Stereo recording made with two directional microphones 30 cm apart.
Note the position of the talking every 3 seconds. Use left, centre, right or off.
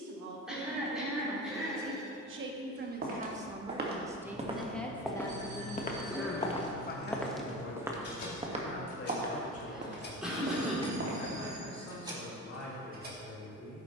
right, centre, left, left, left.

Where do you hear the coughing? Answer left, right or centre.
centre.